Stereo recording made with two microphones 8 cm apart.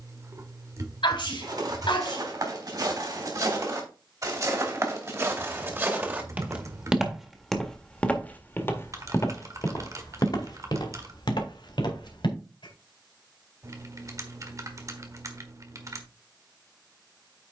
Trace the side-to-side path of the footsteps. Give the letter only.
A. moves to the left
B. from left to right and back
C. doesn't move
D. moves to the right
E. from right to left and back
A.